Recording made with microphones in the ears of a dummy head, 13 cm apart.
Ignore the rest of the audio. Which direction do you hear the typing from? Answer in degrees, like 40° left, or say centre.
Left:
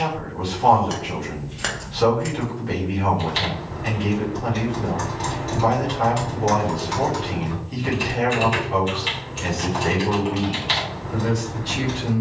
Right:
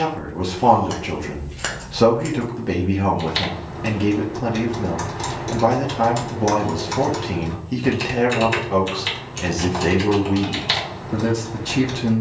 50° right.